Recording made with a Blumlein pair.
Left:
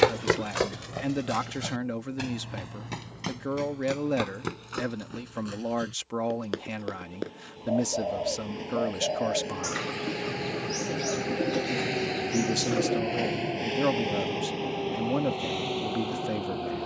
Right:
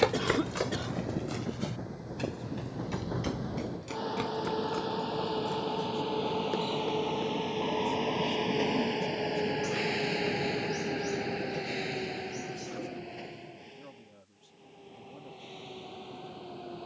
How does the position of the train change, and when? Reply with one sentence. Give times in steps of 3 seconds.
You can hear the train on the right from 0 s, in the centre from 9 s and on the left from 12 s.